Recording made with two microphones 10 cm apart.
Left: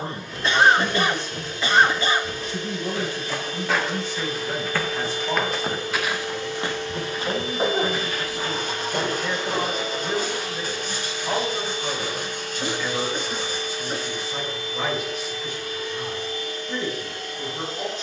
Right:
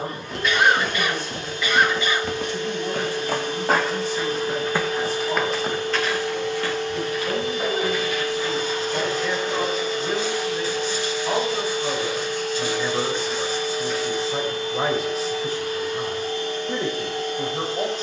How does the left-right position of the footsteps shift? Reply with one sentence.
In this clip you hear the footsteps go from the right side to the left.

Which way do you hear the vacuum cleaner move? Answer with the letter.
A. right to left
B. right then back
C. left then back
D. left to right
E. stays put
E.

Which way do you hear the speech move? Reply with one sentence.
You can hear the speech move from left to right.